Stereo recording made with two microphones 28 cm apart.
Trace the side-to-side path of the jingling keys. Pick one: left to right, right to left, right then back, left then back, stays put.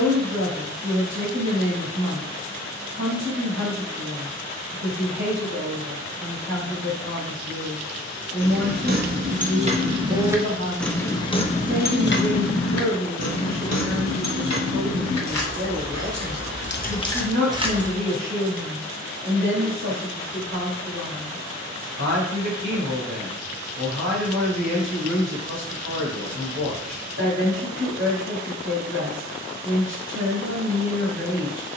left then back.